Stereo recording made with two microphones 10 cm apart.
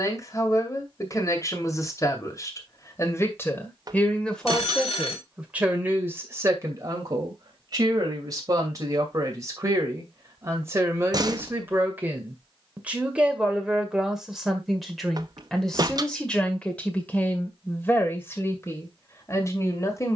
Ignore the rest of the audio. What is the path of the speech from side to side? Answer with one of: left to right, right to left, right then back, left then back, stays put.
right then back.